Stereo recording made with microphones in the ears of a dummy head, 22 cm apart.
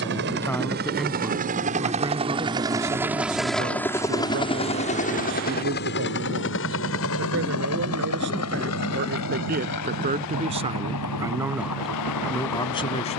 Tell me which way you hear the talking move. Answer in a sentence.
You can hear the talking go right and come back.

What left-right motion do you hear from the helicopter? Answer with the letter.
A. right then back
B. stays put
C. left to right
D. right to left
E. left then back
D.